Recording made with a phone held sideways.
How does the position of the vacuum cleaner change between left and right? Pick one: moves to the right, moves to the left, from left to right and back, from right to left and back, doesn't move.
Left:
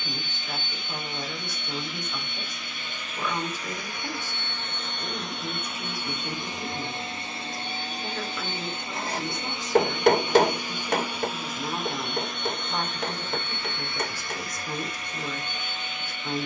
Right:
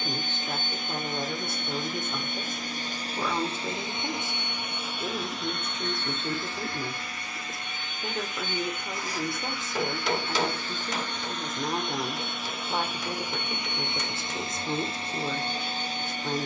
from right to left and back.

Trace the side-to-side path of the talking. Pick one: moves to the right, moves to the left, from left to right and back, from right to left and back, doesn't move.
doesn't move.